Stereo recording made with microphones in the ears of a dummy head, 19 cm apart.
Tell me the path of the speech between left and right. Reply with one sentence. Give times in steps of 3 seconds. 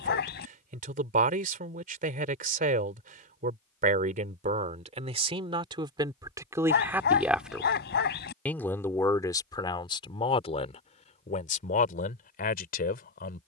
In this clip you hear the speech on the right from 0 s, in the centre from 6 s and on the left from 9 s.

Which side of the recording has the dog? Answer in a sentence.
In this clip you hear the dog on the left.